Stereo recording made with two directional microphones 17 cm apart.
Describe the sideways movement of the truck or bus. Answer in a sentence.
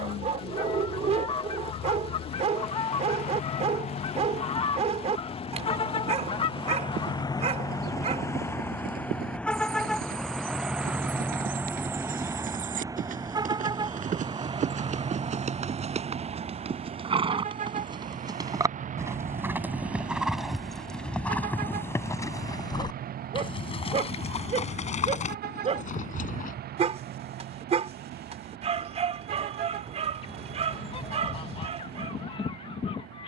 In this clip you hear the truck or bus go from the left side to the right.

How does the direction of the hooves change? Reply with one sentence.
In this clip you hear the hooves move to the left.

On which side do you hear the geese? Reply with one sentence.
In this clip you hear the geese on the left.